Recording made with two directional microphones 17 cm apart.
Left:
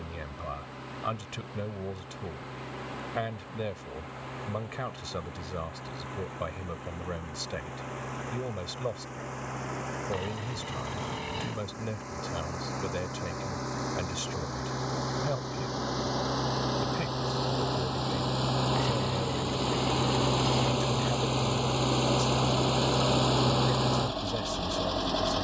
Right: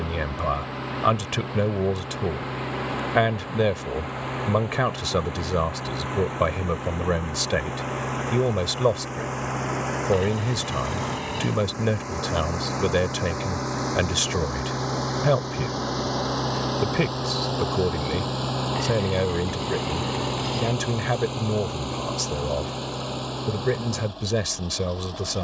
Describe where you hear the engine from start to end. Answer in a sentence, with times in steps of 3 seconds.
You can hear the engine on the right from 0 s, in the centre from 18 s and on the left from 21 s.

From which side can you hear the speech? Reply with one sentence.
You can hear the speech on the right.